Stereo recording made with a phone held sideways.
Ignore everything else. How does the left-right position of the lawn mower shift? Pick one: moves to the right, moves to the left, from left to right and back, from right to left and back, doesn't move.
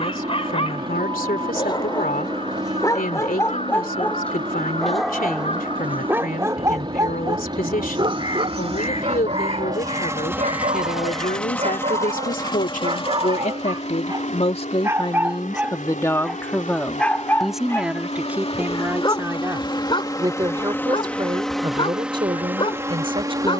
from right to left and back.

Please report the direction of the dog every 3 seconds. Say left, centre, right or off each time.
left, centre, right, right, right, centre, left, left.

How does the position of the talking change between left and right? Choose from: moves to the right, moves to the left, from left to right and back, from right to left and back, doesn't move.
moves to the right.